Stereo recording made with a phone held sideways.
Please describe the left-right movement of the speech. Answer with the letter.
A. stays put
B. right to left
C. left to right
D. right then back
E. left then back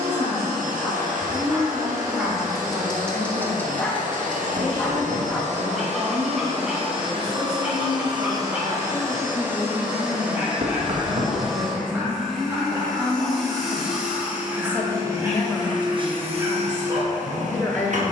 B.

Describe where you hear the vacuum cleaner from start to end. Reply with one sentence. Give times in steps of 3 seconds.
You can hear the vacuum cleaner on the right from 0 s, in the centre from 9 s and on the right from 15 s.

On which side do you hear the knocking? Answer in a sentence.
You can hear the knocking on the right.